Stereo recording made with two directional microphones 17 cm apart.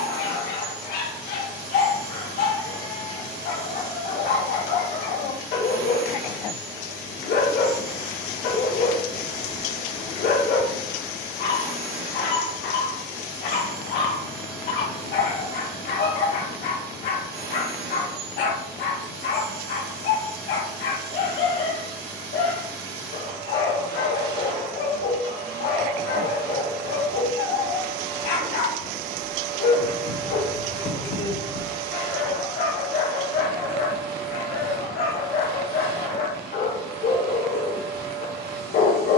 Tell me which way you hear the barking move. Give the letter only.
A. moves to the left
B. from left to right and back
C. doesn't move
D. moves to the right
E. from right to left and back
C.